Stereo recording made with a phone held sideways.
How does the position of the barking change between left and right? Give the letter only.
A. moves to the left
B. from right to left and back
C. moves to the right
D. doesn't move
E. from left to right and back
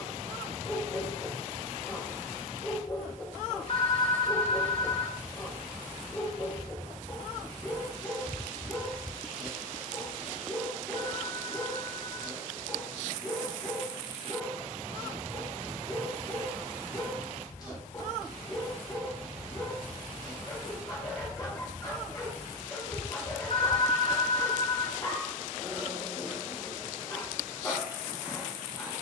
D.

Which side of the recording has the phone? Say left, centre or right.
left.